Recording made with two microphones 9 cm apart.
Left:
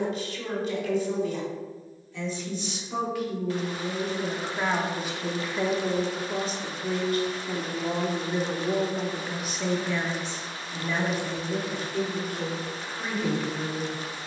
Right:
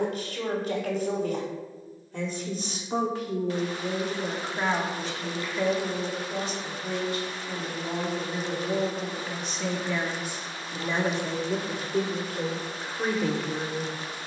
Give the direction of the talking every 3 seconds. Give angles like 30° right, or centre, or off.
40° right, centre, 30° left, 10° right, 40° right.